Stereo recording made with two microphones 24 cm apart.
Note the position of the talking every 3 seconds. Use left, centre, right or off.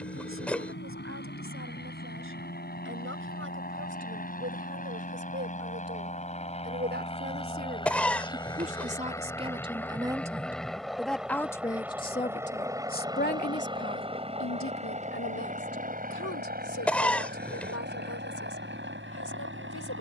right, right, right, centre, left, left, left.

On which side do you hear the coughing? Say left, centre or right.
centre.